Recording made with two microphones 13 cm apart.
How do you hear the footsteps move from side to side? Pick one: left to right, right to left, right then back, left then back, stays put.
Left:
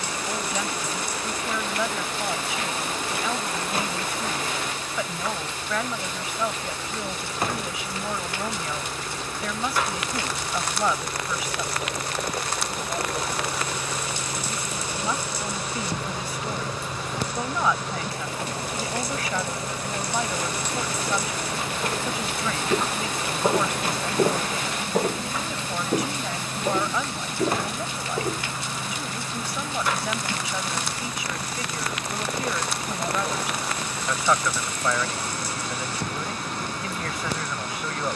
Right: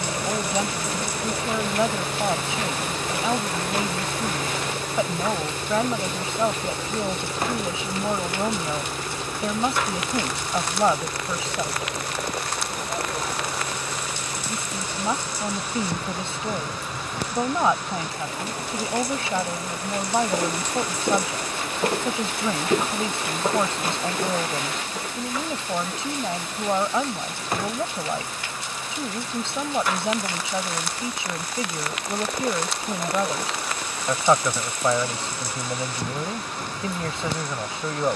right to left.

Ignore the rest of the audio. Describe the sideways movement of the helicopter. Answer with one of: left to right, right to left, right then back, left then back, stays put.
right to left.